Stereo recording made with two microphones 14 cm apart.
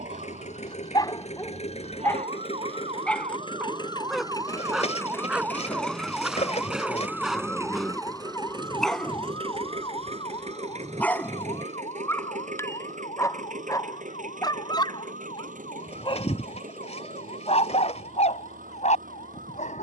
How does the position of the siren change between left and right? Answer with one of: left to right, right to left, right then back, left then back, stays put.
right to left.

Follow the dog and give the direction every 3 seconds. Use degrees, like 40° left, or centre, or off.
20° left, centre, centre, 10° left, 20° left, 40° left, 60° left.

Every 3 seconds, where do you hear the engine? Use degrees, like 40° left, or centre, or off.
50° left, 20° left, 20° right, 50° right, 60° right, 70° right, 80° right.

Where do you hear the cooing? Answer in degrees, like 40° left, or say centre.
50° left.